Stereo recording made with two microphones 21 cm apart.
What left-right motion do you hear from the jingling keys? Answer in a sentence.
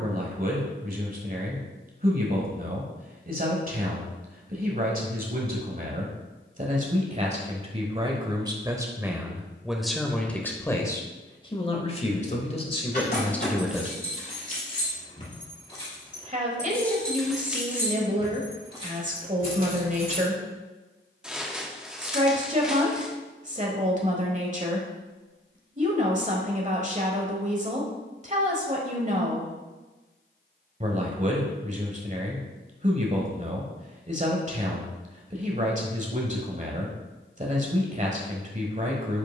You can hear the jingling keys move from left to right.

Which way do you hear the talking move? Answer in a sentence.
You can hear the talking go left and come back.